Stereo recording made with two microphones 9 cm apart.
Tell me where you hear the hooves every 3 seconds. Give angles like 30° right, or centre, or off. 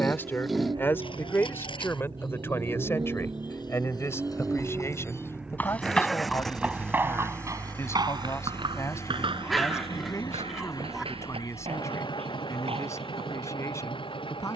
60° left, 40° left, 30° right, 70° right, 80° right.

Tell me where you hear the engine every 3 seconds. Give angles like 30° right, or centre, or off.
40° right, 20° right, 20° left, 40° left, 60° left.